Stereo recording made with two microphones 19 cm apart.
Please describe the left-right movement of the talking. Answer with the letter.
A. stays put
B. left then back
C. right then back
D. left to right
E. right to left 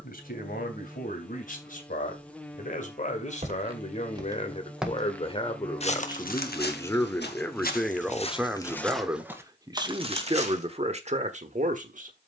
D.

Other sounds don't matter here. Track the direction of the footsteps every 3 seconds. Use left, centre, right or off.
off, centre, left, right.